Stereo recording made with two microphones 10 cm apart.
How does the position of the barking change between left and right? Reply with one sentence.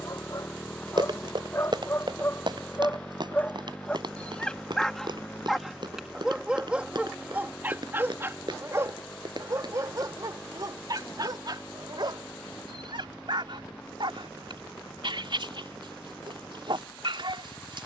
In this clip you hear the barking go from the left side to the right.